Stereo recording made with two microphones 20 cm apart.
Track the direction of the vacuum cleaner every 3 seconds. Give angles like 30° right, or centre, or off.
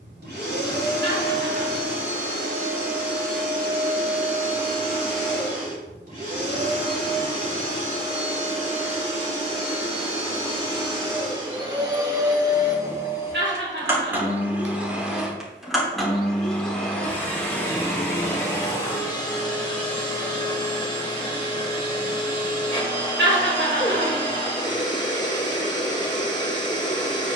60° right, 50° right, 40° right, 30° right, 10° right, centre, 20° left, 20° left, 20° left.